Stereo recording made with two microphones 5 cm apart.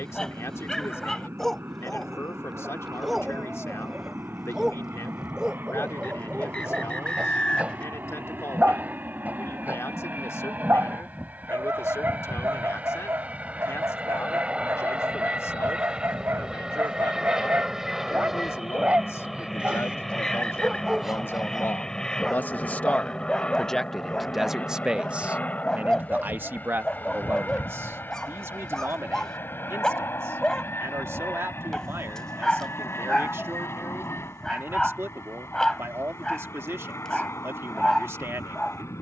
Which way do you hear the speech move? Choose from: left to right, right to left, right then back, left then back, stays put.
left to right.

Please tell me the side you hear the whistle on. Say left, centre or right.
left.